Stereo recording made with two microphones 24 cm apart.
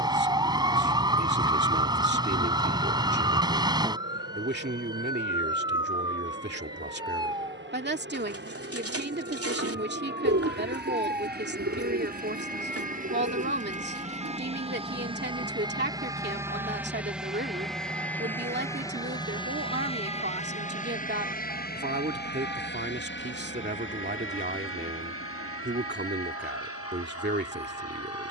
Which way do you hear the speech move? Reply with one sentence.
In this clip you hear the speech stay in one place.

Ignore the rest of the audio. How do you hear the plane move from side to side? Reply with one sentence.
In this clip you hear the plane move to the left.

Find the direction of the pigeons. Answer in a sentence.
In this clip you hear the pigeons on the right.